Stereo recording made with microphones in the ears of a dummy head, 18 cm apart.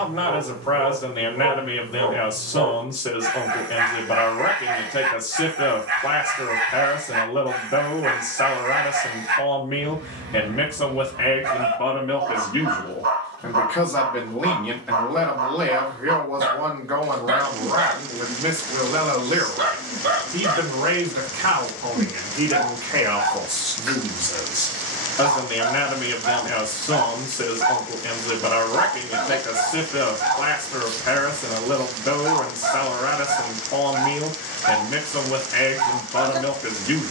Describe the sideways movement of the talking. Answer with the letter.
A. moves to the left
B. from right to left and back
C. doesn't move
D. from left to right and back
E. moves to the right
D.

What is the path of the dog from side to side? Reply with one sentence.
In this clip you hear the dog stay put.